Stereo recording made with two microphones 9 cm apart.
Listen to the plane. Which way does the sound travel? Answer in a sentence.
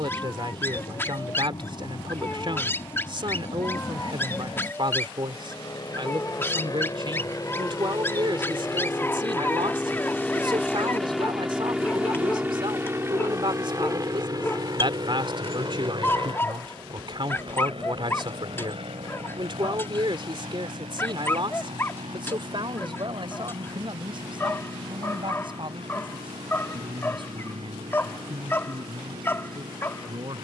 In this clip you hear the plane move from left to right.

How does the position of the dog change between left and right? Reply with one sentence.
In this clip you hear the dog stay put.